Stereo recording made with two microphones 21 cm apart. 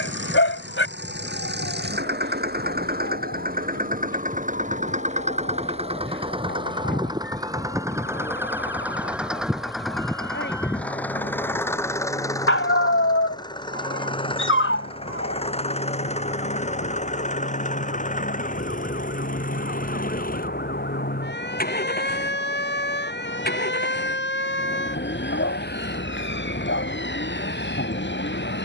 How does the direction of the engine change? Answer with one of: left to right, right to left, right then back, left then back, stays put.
right to left.